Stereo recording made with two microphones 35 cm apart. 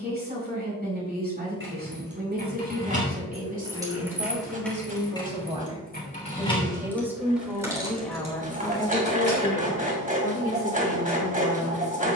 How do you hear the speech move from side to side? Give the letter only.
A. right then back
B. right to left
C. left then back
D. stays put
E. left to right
B.